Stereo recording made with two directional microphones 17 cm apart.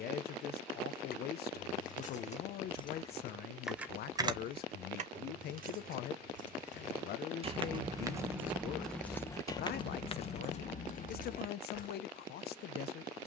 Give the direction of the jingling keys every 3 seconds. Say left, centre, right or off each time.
left, right, right, left, off.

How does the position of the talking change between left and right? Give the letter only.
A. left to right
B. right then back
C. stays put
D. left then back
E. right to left
C.